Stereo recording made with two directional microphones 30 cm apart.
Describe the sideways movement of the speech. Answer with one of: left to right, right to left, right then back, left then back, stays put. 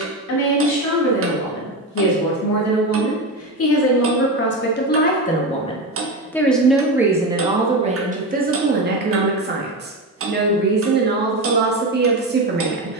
left to right.